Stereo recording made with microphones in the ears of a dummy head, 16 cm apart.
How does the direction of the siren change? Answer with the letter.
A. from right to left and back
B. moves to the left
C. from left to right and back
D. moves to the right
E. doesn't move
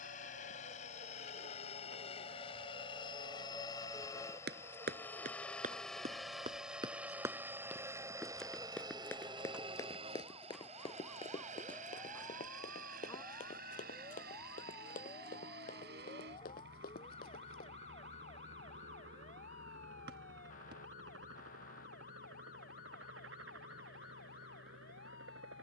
B.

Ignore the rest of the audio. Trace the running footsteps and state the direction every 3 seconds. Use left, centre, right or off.
off, right, centre, left, left, left, off, off, off.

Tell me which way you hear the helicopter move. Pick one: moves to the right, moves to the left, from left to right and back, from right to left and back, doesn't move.
moves to the right.